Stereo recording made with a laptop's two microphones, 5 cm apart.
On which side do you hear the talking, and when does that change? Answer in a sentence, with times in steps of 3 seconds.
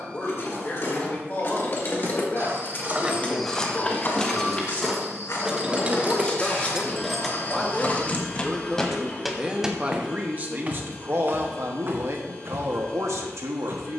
You can hear the talking on the left from 0 s, in the centre from 6 s and on the right from 9 s.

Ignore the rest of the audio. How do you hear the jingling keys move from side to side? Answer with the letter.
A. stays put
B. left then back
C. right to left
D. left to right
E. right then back
E.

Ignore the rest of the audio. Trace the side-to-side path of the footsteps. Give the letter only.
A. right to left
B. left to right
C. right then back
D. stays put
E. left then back
E.